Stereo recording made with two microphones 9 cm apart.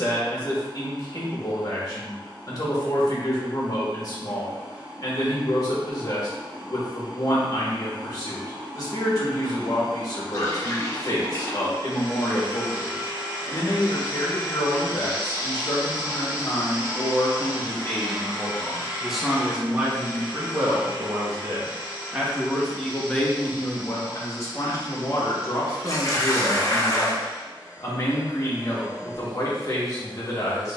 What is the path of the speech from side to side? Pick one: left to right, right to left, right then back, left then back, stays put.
right then back.